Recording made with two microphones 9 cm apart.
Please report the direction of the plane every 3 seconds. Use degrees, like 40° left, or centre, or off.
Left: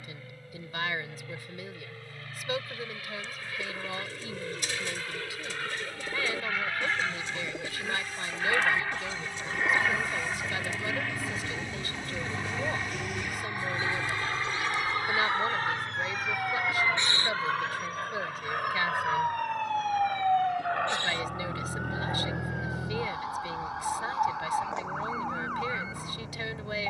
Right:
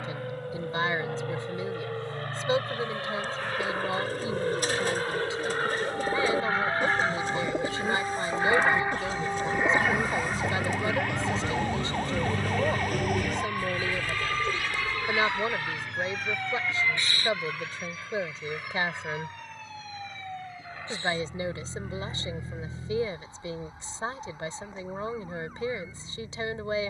60° right, 50° right, 30° right, 10° right, 20° left, 40° left, 50° left, 60° left, off.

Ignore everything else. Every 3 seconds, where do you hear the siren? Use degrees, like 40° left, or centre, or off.
80° right, 80° right, 80° right, 70° right, 50° right, 10° left, 50° left, 70° left, 80° left.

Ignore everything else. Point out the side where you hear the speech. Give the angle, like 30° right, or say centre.
30° right.